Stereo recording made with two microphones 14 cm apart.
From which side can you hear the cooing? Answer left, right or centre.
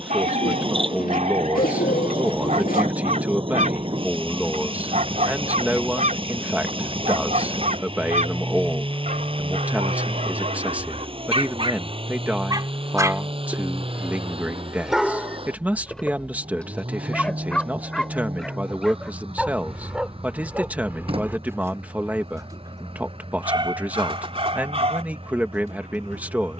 left.